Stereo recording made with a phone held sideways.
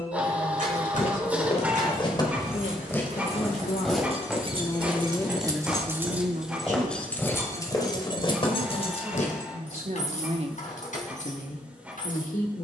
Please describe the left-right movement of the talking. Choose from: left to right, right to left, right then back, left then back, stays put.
right then back.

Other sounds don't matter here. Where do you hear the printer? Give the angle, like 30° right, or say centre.
10° right.